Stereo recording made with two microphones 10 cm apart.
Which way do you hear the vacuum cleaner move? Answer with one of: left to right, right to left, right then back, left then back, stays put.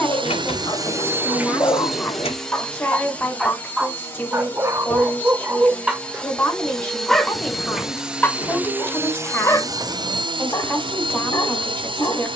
left then back.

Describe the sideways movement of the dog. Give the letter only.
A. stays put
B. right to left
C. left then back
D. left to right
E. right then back
E.